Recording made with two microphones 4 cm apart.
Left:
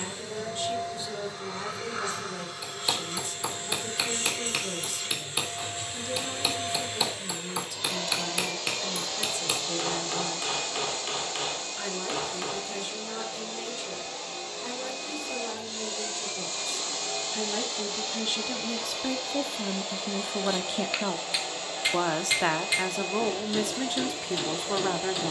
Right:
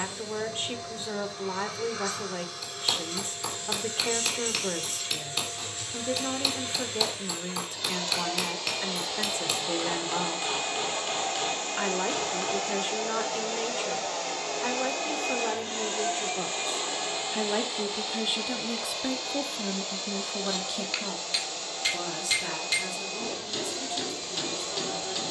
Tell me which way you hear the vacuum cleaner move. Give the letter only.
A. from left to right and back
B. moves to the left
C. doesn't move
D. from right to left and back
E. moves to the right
A.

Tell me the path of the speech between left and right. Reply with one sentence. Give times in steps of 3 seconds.
In this clip you hear the speech on the right from 0 s, in the centre from 18 s and on the left from 21 s.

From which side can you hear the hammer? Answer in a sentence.
In this clip you hear the hammer in the centre.